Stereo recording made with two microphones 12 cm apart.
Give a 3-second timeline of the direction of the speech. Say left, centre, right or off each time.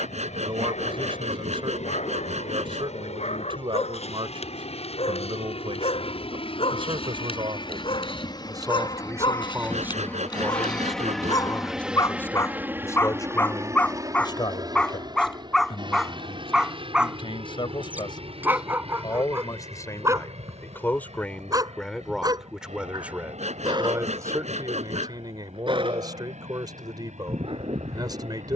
right, right, right, centre, left, left, left, centre, right, right.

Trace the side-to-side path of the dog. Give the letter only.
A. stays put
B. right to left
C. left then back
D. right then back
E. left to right
E.